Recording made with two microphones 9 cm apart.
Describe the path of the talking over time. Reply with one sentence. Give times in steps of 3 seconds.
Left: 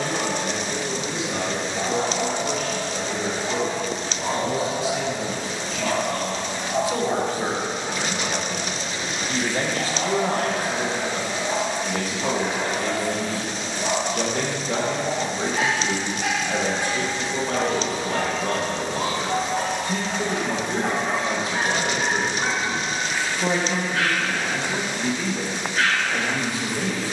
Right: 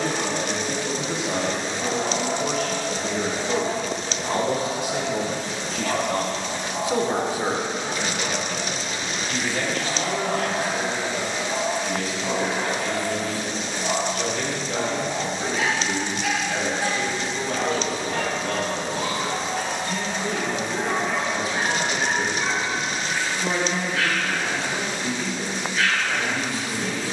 You can hear the talking on the right from 0 s, in the centre from 6 s and on the left from 9 s.